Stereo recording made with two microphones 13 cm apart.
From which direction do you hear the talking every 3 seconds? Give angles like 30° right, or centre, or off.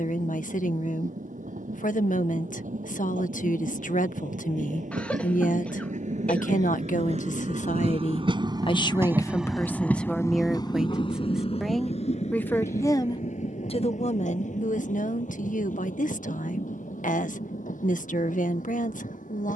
80° left, 80° left, 70° left, 10° left, 50° left, 80° left, 80° left.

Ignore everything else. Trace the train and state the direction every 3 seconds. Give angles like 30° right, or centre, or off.
80° right, 70° right, 50° right, 20° left, 60° left, 70° left, 80° left.